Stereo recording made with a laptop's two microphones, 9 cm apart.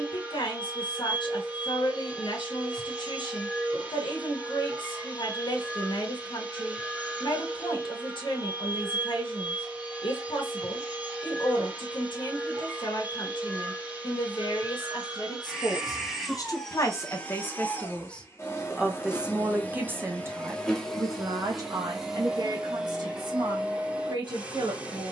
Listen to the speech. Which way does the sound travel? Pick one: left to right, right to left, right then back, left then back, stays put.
left to right.